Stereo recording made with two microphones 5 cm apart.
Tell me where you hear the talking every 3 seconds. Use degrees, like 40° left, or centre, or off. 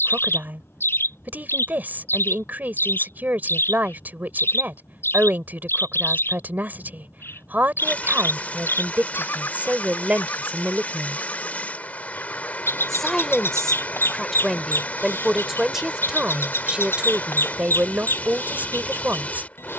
40° right, 40° right, 40° right, 20° right, centre, 20° right, 30° right.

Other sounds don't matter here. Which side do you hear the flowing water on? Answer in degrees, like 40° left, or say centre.
30° left.